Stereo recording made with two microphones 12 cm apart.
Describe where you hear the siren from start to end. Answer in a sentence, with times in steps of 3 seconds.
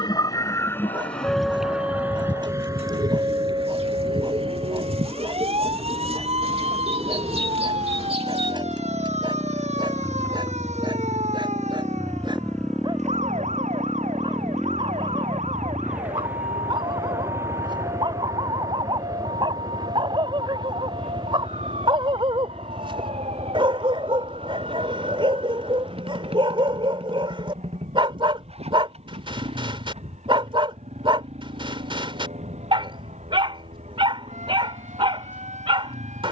In this clip you hear the siren in the centre from 0 s and on the right from 3 s.